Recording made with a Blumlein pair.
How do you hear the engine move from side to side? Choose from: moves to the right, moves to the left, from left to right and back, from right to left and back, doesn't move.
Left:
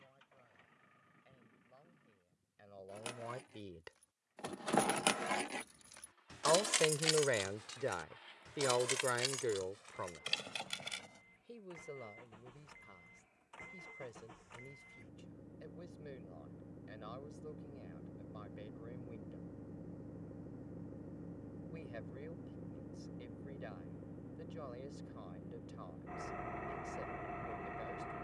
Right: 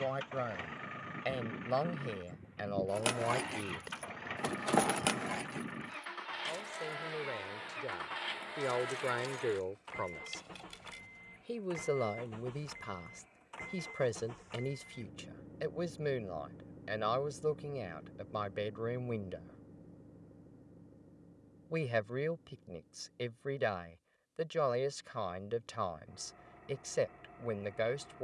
moves to the left.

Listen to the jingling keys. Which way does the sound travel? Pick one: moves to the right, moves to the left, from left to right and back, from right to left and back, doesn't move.
moves to the left.